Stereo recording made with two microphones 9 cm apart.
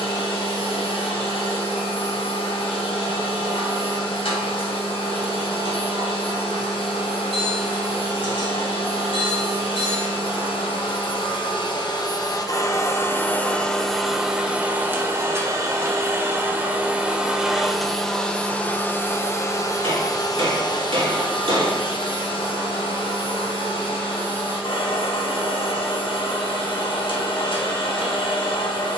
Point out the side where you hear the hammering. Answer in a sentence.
You can hear the hammering on the right.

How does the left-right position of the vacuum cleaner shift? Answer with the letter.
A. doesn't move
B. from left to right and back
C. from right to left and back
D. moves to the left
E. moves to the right
B.